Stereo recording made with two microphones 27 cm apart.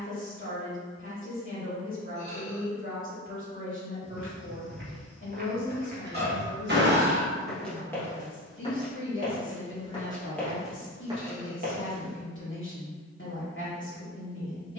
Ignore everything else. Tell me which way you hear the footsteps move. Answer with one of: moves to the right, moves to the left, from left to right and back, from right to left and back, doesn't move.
from right to left and back.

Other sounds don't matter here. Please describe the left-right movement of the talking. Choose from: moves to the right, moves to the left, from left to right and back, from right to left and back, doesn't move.
doesn't move.